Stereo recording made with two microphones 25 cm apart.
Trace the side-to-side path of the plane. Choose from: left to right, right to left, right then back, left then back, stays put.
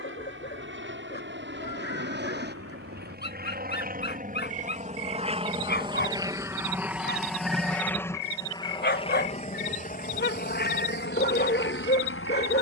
right to left.